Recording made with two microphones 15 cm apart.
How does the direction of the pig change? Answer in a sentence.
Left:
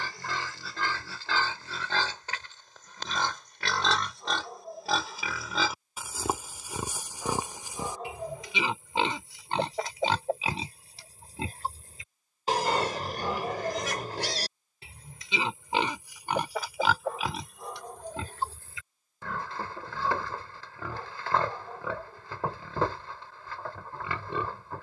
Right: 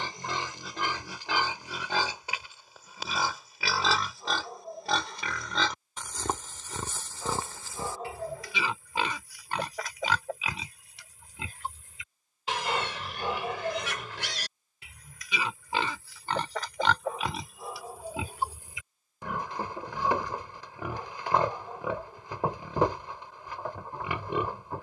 You can hear the pig go left and come back.